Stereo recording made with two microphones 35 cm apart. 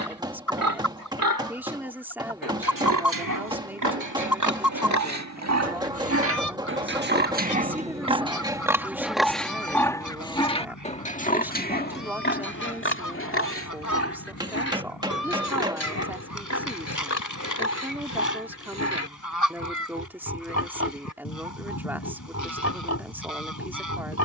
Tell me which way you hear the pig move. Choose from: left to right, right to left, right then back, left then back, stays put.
right to left.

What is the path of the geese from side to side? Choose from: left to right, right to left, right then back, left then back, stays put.
stays put.